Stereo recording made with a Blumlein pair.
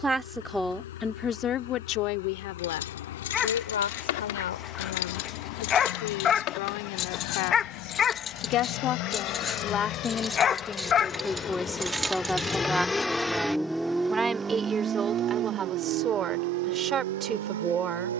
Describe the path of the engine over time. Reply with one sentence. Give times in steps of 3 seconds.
You can hear the engine on the left from 0 s, in the centre from 12 s and on the right from 15 s.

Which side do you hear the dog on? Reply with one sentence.
You can hear the dog on the left.